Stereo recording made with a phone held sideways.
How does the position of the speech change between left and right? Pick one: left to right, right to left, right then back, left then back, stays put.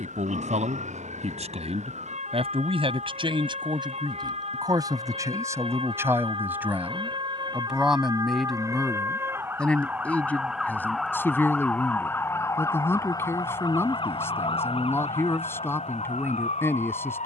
right to left.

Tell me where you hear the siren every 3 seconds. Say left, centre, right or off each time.
right, right, right, centre, left, left.